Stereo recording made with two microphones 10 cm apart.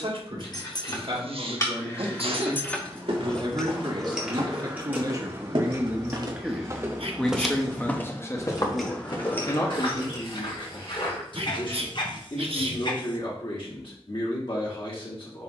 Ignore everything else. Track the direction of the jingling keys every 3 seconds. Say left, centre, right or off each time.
left, centre, right, left, off.